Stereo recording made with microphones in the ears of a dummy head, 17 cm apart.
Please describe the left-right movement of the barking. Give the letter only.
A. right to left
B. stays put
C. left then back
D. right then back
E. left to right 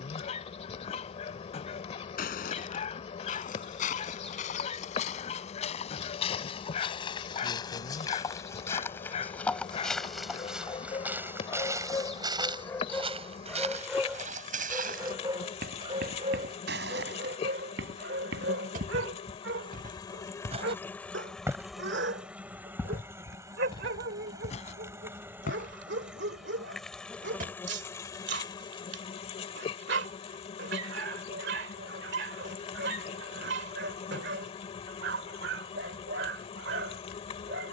E.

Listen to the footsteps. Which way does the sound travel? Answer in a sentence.
In this clip you hear the footsteps go right and come back.